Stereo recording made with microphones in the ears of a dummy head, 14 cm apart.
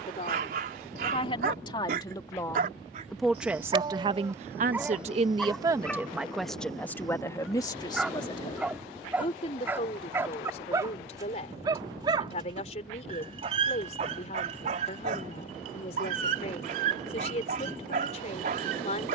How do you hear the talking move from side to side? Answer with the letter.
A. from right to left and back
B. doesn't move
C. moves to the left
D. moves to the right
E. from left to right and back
E.